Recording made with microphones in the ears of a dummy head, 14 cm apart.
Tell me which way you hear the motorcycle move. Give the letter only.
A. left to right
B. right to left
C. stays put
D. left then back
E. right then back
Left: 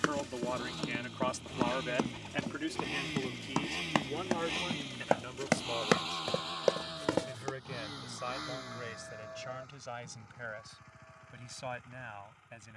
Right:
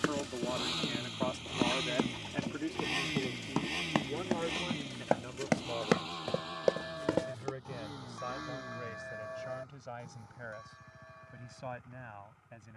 B.